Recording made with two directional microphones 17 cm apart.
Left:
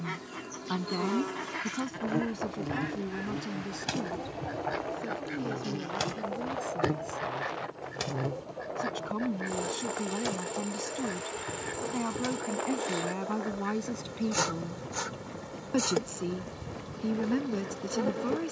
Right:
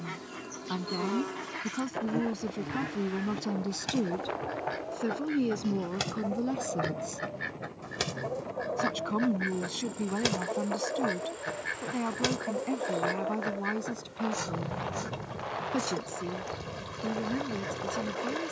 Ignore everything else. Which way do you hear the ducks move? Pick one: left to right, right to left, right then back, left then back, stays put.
left to right.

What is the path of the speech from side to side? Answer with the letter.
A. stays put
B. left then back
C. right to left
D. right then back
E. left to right
D.